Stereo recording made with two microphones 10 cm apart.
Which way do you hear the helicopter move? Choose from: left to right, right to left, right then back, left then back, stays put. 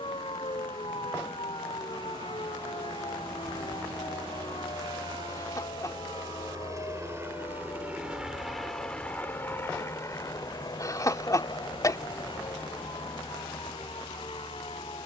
right to left.